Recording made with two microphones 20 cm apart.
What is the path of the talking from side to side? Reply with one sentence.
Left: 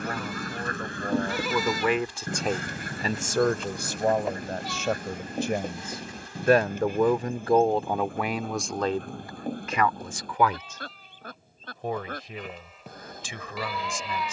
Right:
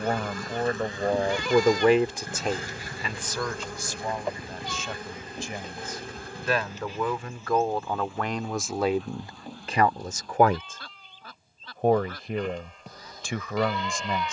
In this clip you hear the talking go left and come back.